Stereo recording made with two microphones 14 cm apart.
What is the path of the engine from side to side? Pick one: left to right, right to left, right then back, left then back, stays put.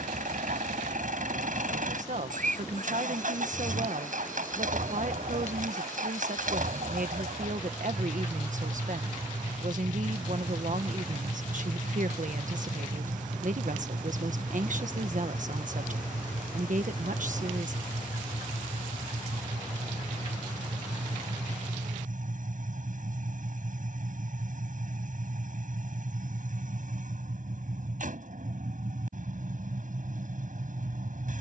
stays put.